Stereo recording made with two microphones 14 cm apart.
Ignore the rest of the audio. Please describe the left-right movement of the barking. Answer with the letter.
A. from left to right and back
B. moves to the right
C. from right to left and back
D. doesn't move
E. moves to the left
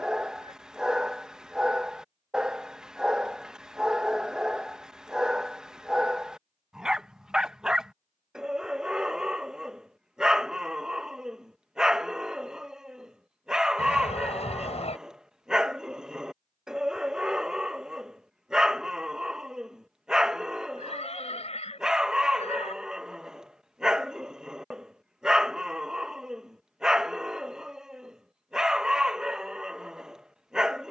D.